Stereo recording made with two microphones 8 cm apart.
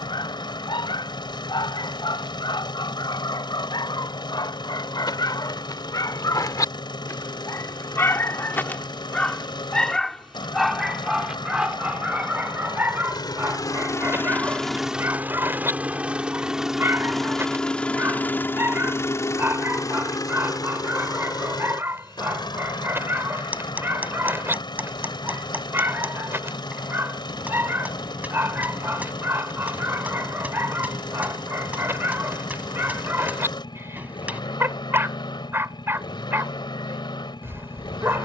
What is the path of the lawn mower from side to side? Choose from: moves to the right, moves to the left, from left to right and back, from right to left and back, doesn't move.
from left to right and back.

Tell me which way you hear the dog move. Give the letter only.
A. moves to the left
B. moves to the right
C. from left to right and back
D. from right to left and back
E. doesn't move
B.